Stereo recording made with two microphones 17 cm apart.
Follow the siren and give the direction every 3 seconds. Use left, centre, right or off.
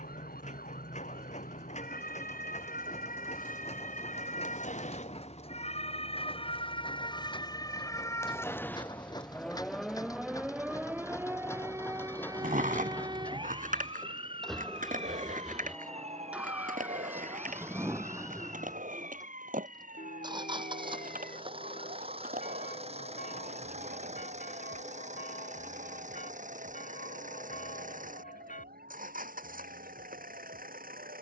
left, left, left, centre, right, right, right, right, right, right, right.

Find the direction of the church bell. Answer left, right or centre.
left.